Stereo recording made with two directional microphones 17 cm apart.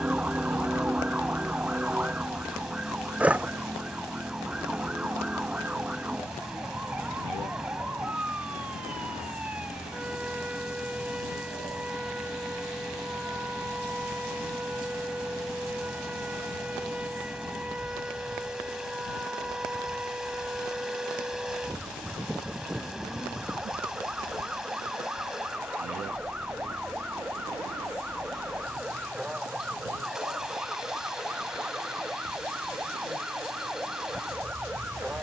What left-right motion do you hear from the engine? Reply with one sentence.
In this clip you hear the engine stay put.